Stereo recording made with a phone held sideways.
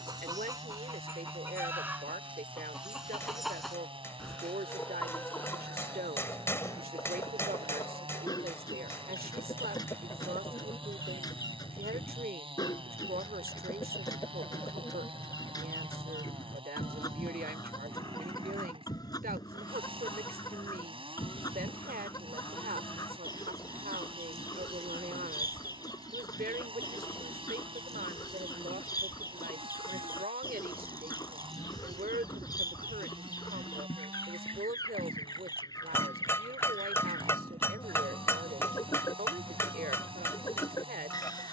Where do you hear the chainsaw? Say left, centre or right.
right.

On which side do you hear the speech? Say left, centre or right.
right.